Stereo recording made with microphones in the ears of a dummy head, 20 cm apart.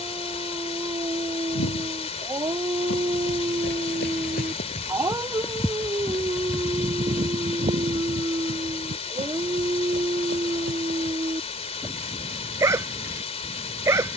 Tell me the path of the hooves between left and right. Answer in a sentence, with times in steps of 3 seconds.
You can hear the hooves on the left from 0 s, on the right from 6 s and not at all from 12 s.